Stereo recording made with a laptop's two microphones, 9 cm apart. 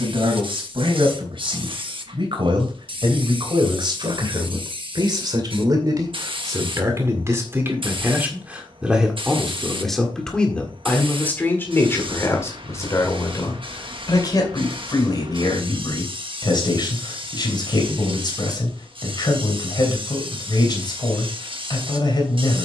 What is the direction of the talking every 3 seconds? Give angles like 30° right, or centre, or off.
70° right, 60° right, 30° right, 10° left, 40° left, 50° left, 50° left, 50° left.